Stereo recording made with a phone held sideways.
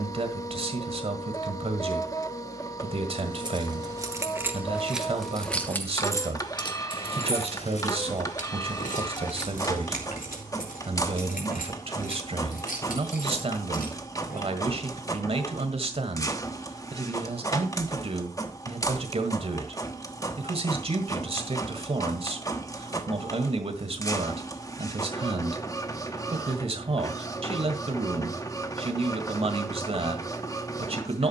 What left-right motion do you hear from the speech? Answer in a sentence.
You can hear the speech stay in one place.